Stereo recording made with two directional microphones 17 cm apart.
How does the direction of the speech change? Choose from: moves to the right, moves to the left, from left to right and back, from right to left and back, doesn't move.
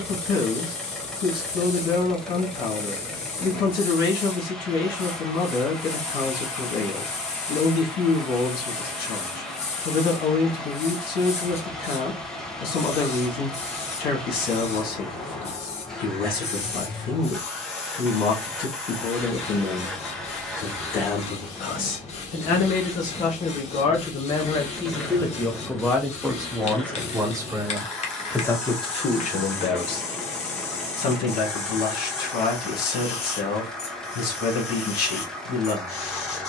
from left to right and back.